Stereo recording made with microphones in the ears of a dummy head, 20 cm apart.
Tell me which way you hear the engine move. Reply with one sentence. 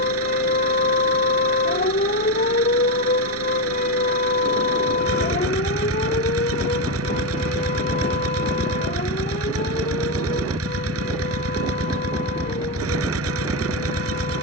You can hear the engine stay in one place.